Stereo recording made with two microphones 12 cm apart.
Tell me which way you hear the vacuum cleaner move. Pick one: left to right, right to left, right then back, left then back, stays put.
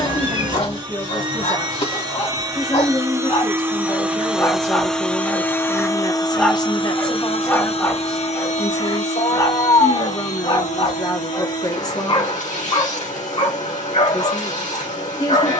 right to left.